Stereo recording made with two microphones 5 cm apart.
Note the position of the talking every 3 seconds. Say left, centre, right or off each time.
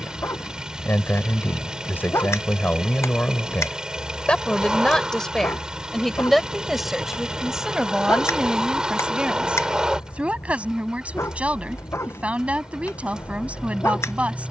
left, left, centre, right, right.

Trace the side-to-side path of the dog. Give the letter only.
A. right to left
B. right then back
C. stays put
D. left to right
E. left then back
C.